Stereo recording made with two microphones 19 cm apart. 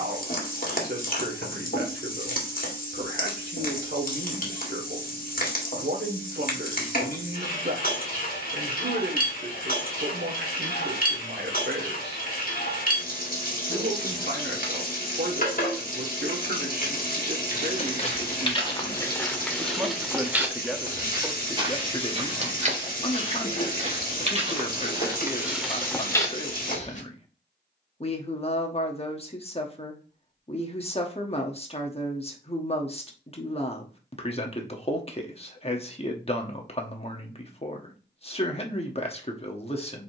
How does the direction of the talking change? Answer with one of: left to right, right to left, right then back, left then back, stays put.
right to left.